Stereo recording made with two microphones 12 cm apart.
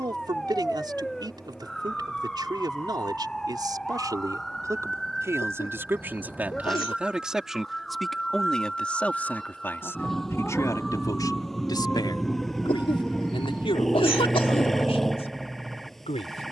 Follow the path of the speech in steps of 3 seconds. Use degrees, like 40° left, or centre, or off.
40° right, 30° right, centre, 20° left, 40° left, 60° left.